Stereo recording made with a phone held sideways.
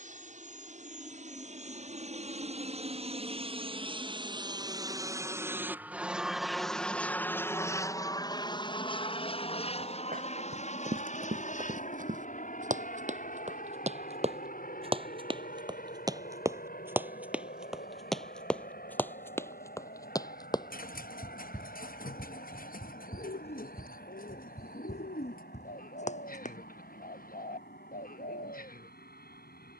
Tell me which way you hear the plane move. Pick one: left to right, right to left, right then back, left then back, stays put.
right to left.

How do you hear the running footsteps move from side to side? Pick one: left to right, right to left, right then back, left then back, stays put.
right to left.